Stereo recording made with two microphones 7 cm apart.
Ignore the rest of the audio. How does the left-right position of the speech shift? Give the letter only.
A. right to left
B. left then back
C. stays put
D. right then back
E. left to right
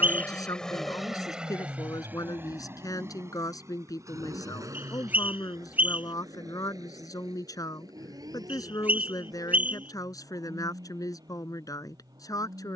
C.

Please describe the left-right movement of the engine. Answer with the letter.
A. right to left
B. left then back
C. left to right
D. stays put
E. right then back
C.